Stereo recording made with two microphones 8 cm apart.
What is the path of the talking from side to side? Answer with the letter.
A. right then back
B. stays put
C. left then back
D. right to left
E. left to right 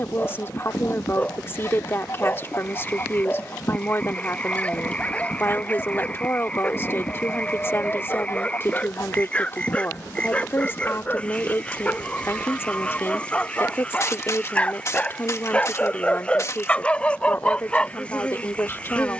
B.